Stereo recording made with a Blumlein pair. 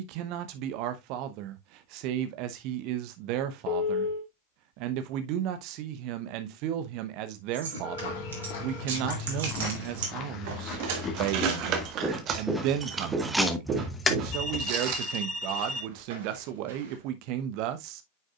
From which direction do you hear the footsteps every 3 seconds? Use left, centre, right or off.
off, off, left, left, right, right.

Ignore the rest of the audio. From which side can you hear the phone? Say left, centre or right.
left.